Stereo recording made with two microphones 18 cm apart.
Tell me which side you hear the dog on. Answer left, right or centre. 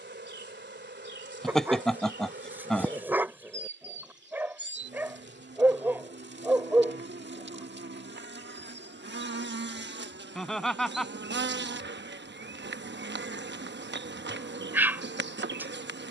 centre.